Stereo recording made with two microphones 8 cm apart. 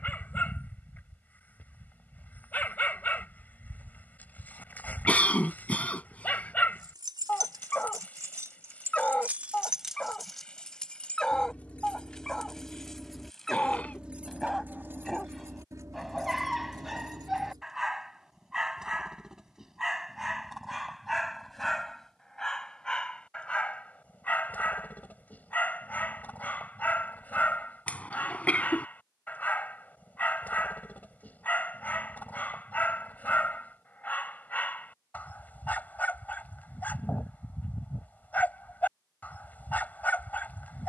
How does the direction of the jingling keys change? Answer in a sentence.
You can hear the jingling keys move from right to left and back again.